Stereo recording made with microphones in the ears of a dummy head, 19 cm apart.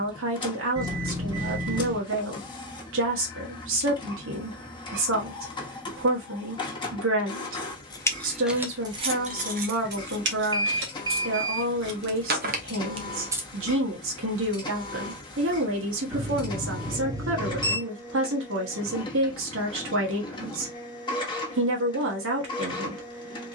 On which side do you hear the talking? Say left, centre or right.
right.